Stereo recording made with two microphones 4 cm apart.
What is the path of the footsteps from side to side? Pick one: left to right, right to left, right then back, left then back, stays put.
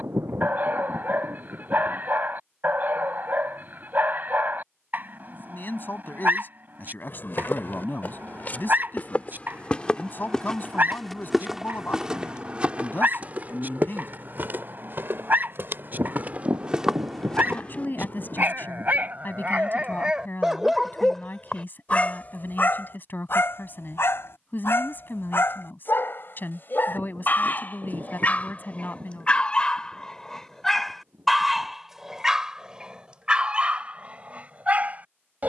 right then back.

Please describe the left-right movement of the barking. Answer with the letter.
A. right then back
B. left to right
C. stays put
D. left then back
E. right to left
D.